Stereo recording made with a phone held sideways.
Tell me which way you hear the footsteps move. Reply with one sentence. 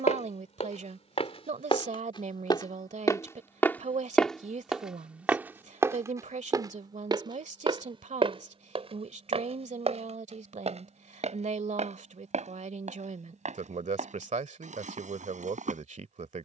You can hear the footsteps move to the right.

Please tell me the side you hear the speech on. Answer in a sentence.
In this clip you hear the speech on the right.